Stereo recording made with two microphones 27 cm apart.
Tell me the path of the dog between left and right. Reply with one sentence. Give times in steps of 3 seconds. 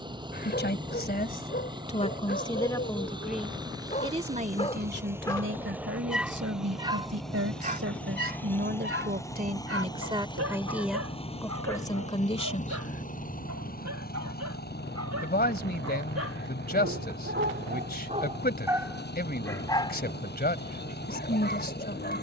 In this clip you hear the dog on the left from 0 s, on the right from 6 s, in the centre from 18 s and on the left from 21 s.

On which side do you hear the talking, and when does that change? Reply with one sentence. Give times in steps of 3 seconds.
You can hear the talking on the left from 0 s, on the right from 3 s, in the centre from 9 s and on the left from 12 s.